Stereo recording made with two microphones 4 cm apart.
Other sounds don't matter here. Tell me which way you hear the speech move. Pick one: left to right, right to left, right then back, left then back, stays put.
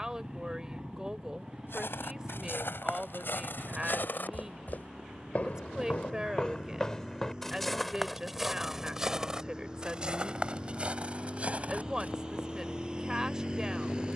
stays put.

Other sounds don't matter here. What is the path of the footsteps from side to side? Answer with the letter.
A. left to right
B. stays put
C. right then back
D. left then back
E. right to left
A.